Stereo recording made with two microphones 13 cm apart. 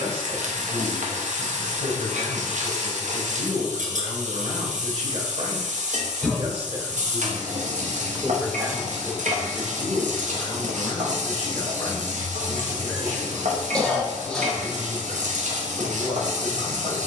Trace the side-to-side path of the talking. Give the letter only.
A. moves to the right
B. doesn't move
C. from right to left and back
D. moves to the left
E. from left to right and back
D.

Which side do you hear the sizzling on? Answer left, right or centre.
right.